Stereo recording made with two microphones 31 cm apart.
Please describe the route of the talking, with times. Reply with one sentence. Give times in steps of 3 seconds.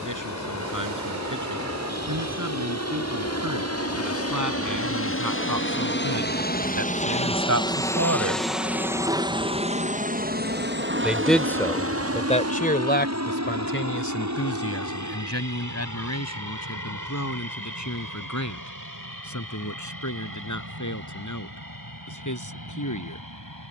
You can hear the talking on the right from 0 s, in the centre from 9 s and on the left from 12 s.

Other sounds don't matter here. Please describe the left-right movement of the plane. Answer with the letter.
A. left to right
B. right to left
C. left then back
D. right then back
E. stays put
A.